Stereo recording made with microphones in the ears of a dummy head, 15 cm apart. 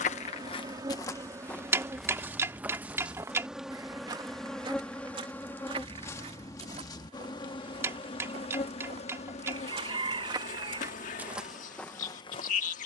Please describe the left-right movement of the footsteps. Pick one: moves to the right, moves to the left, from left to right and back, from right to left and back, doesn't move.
from left to right and back.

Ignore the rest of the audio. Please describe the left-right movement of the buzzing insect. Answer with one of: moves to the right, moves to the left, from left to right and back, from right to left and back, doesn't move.
moves to the left.